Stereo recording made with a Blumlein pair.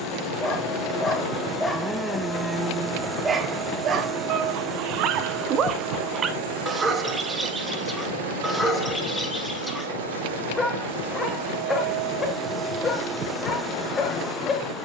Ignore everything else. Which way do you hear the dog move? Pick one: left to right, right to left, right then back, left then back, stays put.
right then back.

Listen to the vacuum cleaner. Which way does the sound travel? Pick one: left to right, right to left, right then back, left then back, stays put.
right then back.